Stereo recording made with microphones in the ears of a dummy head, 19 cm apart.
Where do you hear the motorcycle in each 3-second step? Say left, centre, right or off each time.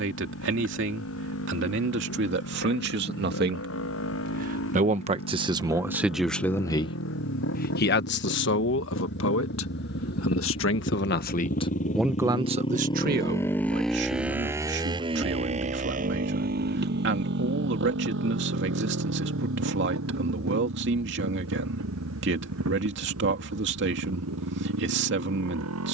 left, left, left, left, centre, right, right, right, right.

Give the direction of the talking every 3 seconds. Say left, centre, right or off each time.
right, right, left, left, right, right, right, right, right.